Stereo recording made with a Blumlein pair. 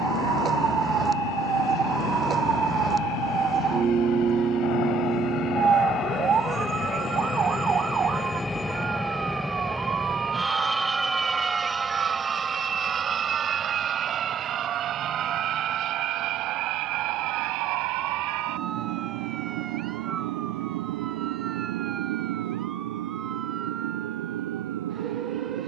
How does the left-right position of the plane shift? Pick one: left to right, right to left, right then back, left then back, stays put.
left to right.